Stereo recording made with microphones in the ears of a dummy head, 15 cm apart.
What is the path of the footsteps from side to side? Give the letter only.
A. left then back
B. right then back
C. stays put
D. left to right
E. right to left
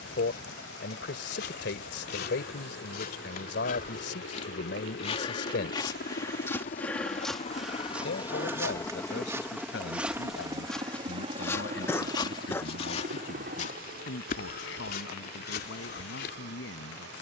B.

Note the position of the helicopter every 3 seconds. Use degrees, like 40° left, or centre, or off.
80° left, 60° left, 40° left, 20° right, 50° right, 60° right.